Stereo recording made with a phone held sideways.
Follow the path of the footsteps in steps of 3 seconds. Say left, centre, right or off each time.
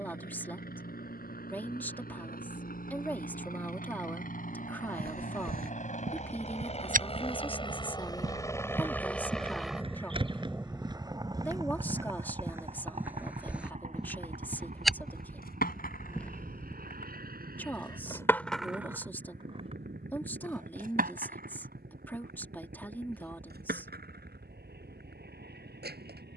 off, right, right, right, centre, centre, off, off, off.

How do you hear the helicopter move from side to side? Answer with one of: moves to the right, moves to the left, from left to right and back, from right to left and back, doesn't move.
moves to the right.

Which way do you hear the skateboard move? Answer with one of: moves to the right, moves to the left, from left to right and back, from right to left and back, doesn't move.
moves to the right.